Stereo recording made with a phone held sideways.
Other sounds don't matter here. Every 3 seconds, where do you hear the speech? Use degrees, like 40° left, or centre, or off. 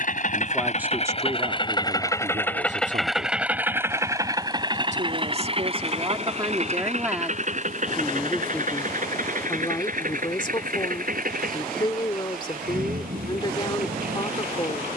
30° right, 40° right, 10° right, 30° left, 30° left.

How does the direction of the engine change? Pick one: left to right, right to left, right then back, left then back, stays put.
left to right.